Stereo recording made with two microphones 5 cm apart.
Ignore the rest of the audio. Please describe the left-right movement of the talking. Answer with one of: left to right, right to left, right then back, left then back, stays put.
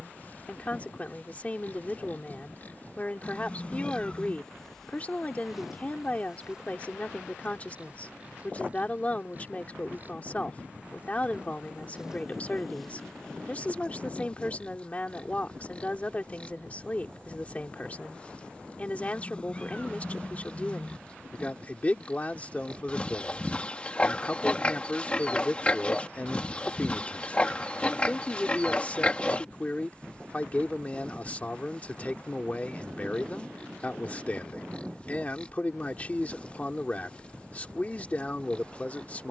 stays put.